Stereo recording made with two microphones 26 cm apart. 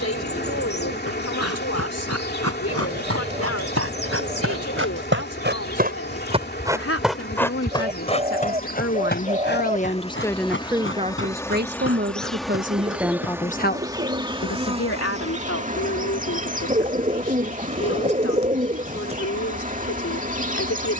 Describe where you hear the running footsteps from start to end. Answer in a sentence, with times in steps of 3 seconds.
You can hear the running footsteps on the right from 0 s, in the centre from 6 s, on the left from 9 s and not at all from 15 s.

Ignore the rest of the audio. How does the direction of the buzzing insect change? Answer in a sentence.
You can hear the buzzing insect go from the left side to the right.